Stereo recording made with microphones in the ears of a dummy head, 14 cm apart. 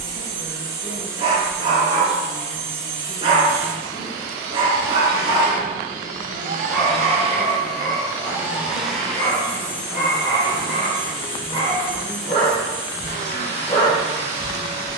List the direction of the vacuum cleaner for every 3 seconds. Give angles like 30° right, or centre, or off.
70° right, 70° right, 30° right, 20° left, 50° left.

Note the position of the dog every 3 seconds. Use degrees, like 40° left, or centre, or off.
40° right, 30° right, 10° left, 30° left, 40° left.